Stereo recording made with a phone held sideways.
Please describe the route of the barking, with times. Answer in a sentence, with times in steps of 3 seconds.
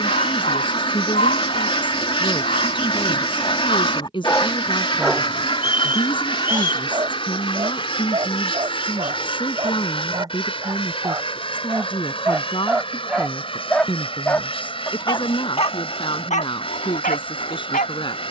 You can hear the barking on the left from 0 s, on the right from 6 s, in the centre from 12 s and on the left from 15 s.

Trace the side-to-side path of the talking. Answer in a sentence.
In this clip you hear the talking stay in one place.